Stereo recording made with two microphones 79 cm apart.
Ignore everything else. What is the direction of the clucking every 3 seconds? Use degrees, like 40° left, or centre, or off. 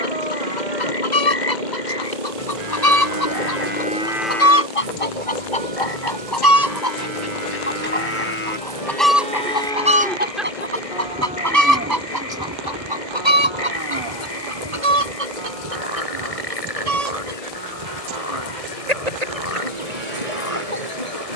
60° left, 40° left, 20° left, 10° right, 40° right, 50° right, 60° right.